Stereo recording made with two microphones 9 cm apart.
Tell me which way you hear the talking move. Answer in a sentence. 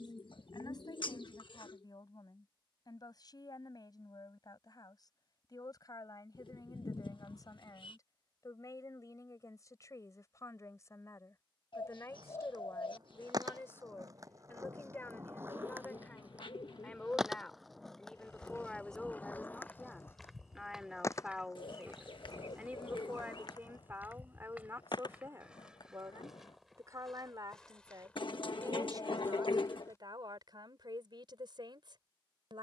You can hear the talking go from the left side to the right.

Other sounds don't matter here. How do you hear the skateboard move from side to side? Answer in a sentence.
You can hear the skateboard move from right to left.